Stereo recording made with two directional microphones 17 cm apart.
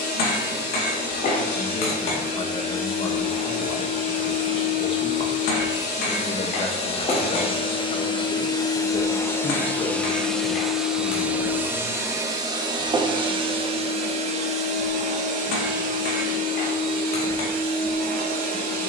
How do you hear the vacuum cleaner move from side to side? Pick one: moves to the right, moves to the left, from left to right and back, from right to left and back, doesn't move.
moves to the right.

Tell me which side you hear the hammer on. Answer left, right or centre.
left.